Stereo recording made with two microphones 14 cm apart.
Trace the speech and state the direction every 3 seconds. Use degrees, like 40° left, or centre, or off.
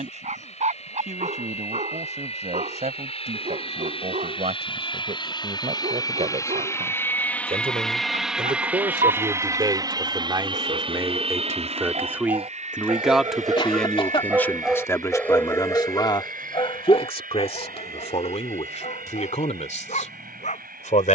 60° right, 60° right, 50° right, 30° right, centre, 40° left, 60° left.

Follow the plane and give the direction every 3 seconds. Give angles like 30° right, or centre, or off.
60° left, 40° left, 10° left, 30° right, 60° right, 70° right, 80° right.